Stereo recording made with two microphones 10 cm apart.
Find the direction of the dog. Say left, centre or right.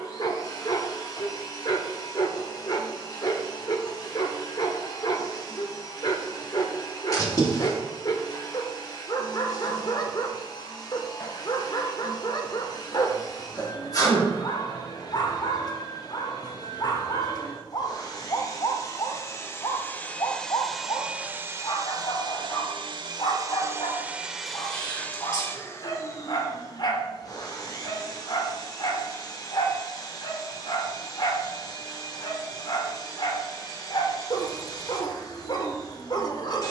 left.